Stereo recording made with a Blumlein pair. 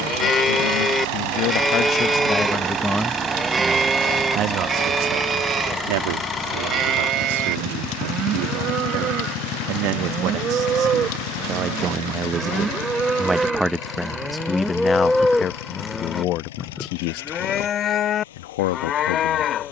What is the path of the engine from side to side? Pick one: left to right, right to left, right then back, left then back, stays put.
right to left.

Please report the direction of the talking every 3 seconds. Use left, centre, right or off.
left, right, right, right, centre, left, left.